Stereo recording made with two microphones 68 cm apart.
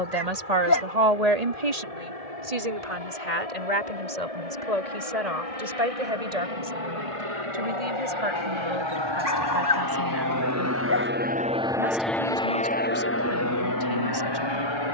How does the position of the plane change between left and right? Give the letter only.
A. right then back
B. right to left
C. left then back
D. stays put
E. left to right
B.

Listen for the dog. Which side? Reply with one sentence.
In this clip you hear the dog on the left.